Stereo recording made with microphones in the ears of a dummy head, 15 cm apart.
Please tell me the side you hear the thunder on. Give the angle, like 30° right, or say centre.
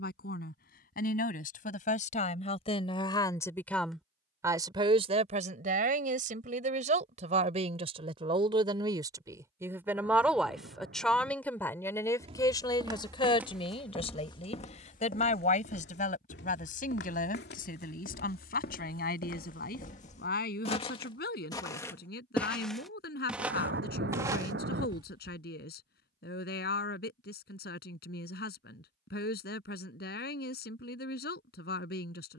70° right.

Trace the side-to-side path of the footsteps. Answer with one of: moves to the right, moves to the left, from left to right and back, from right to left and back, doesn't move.
from right to left and back.